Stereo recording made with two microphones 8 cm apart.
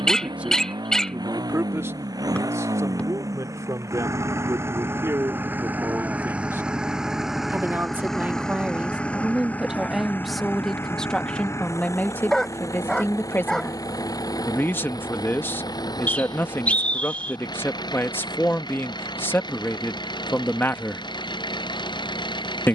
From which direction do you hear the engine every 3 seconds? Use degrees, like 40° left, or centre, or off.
50° right, 30° right, centre, 30° left, 40° left, 50° left, 60° left, 60° left.